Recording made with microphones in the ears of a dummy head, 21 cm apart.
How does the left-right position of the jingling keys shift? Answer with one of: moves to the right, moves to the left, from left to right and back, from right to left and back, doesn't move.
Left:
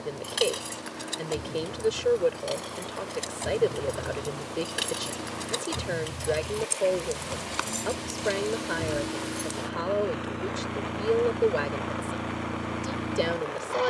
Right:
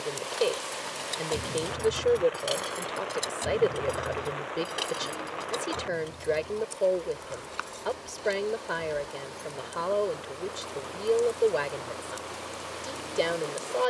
from left to right and back.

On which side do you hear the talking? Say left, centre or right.
centre.